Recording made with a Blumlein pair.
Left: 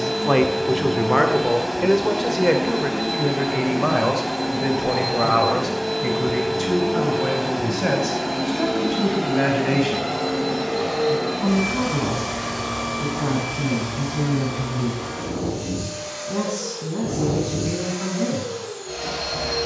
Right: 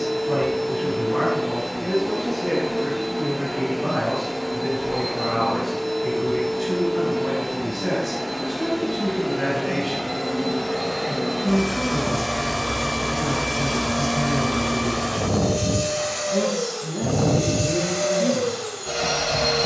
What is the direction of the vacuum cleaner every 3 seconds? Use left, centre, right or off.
left, left, left, centre, right, right, right.